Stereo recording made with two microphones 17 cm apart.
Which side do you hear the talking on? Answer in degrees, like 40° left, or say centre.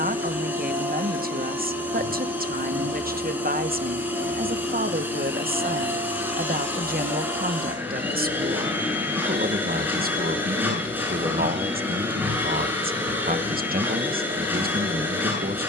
60° right.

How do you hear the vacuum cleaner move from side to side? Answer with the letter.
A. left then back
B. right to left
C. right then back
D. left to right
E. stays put
E.